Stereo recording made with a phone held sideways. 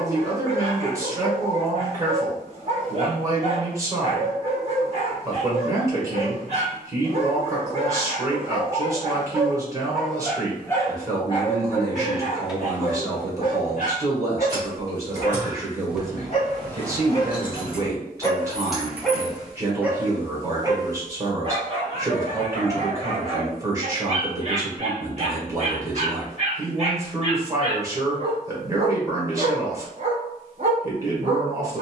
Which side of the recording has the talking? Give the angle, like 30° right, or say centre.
20° right.